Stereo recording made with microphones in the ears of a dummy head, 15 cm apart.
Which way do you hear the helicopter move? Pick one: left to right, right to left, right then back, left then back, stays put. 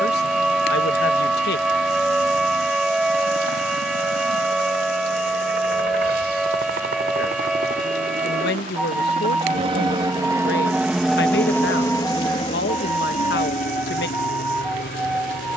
right to left.